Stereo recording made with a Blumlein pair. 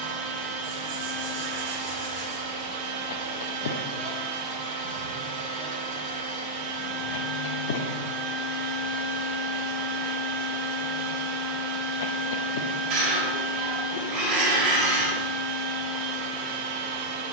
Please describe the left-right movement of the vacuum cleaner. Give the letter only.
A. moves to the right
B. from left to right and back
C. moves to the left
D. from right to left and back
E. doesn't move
E.